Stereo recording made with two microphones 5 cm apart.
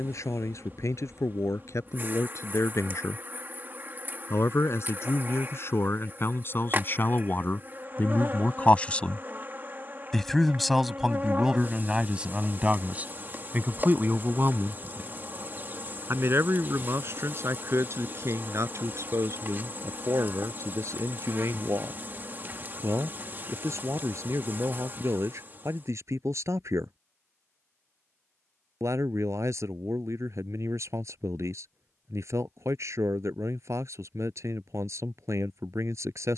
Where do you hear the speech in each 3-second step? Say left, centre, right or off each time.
left, left, left, centre, right, right, right, right, right, right, right, right.